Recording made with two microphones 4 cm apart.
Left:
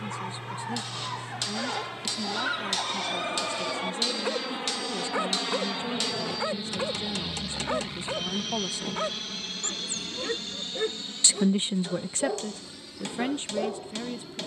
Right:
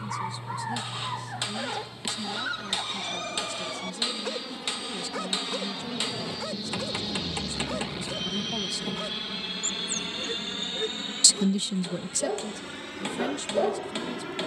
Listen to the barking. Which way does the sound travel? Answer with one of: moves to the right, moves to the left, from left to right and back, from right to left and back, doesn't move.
from right to left and back.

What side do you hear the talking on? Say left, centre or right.
left.